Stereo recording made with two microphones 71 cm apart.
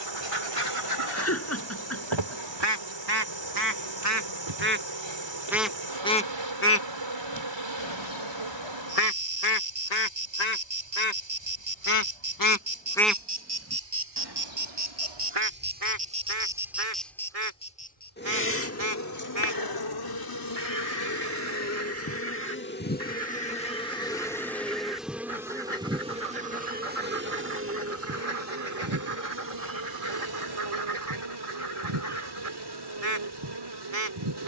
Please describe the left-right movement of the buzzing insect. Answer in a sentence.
You can hear the buzzing insect go left and come back.